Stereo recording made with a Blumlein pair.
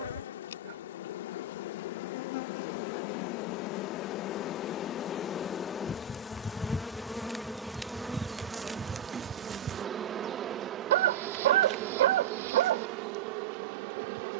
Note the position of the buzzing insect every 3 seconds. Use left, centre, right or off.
left, left, centre, right, right.